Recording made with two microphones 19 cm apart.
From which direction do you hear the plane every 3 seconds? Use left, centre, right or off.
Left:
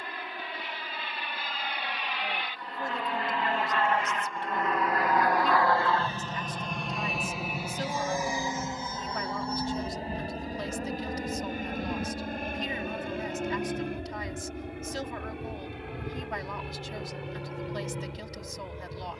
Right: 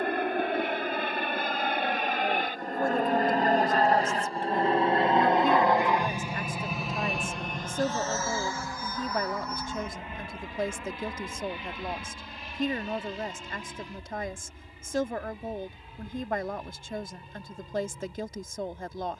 right, right, centre, left, left, left, left.